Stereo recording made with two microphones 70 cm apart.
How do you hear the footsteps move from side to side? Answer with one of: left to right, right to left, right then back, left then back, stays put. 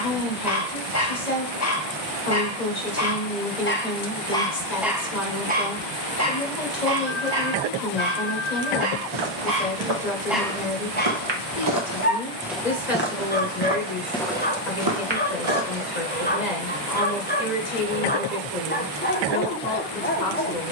left then back.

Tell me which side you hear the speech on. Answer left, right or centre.
left.